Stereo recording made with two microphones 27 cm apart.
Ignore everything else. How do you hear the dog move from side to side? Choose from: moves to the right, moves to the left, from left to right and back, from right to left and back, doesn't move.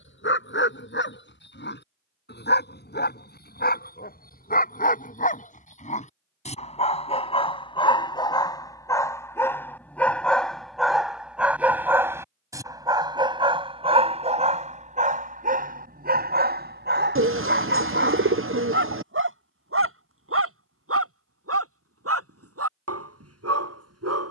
moves to the right.